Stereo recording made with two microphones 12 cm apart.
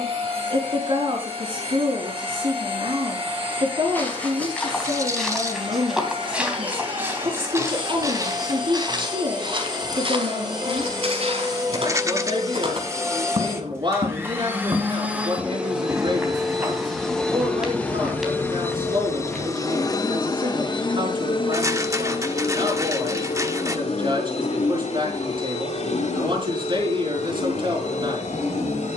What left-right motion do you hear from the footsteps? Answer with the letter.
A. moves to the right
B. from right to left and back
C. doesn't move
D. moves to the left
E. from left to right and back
E.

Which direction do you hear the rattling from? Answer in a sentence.
You can hear the rattling on the right.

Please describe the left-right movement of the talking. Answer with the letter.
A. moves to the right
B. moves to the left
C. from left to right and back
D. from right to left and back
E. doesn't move
E.